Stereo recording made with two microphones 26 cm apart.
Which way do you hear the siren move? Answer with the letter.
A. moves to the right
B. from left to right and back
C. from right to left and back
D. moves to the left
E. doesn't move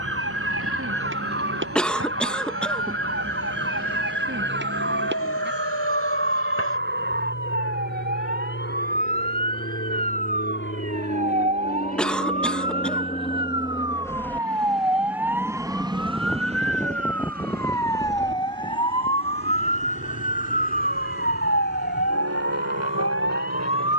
D.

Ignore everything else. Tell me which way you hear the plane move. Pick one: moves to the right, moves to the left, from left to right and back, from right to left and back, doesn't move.
moves to the right.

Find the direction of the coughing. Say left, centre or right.
centre.